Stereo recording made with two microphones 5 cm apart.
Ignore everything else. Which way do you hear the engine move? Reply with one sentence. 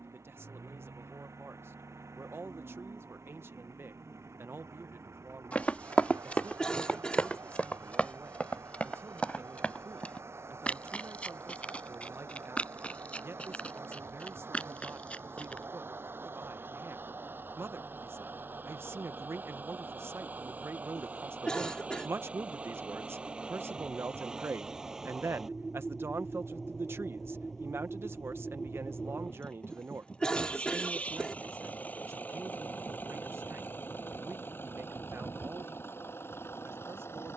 In this clip you hear the engine go from the right side to the left.